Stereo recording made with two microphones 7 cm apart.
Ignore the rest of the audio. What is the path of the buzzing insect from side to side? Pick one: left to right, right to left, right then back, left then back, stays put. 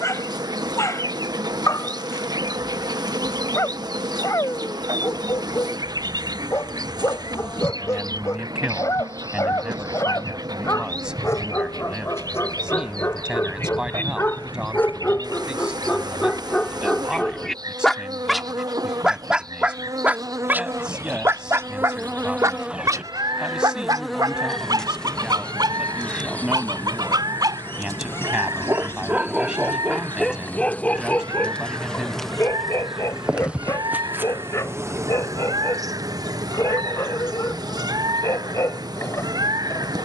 left then back.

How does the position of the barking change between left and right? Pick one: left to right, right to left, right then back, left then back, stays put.
right then back.